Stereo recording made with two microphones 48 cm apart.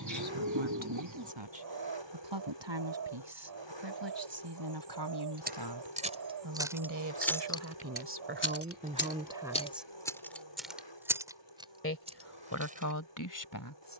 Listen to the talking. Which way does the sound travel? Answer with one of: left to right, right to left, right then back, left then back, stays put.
right to left.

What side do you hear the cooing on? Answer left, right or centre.
right.